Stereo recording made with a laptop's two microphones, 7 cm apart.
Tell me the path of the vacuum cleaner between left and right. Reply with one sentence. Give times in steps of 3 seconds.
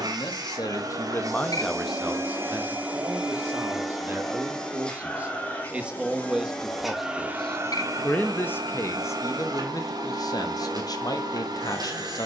You can hear the vacuum cleaner on the right from 0 s, in the centre from 3 s and on the right from 6 s.